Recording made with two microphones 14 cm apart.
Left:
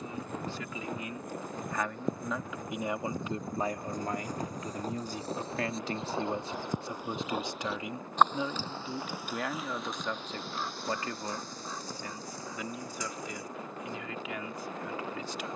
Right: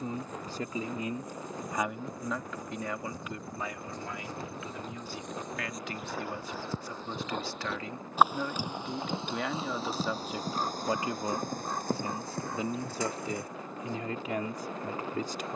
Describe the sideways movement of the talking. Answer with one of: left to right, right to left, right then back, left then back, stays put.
left then back.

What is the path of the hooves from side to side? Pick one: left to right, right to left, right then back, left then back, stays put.
left to right.